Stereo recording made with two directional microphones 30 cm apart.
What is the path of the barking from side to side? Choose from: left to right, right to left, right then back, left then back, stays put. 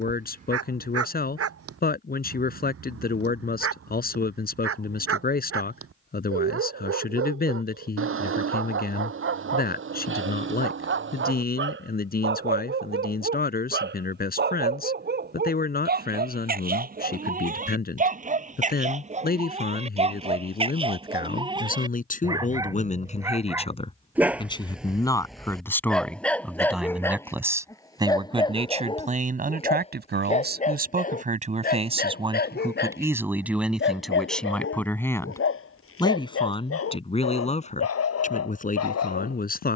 right to left.